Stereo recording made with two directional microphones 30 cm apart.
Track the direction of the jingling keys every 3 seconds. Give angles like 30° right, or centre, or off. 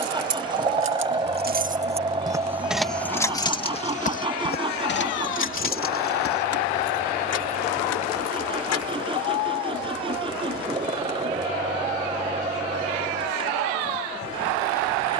30° right, 30° left, 50° left, off, off.